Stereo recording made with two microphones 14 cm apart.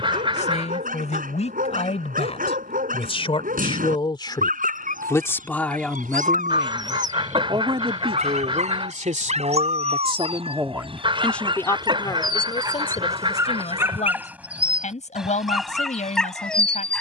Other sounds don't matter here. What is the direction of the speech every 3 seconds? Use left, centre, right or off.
left, left, right, right, left, left.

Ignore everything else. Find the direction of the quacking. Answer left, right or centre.
right.